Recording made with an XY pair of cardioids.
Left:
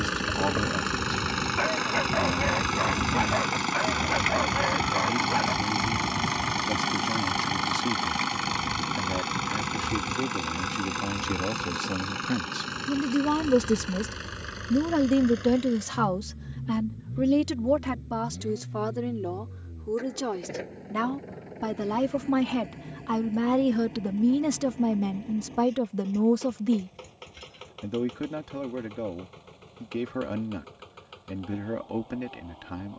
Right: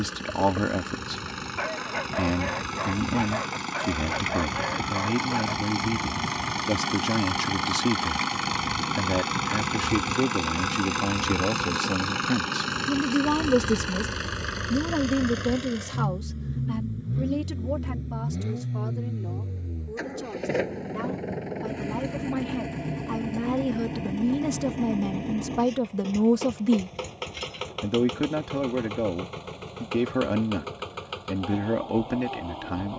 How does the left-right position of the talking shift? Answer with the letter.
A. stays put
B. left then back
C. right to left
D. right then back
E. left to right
B.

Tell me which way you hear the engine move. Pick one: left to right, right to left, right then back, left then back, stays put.
left to right.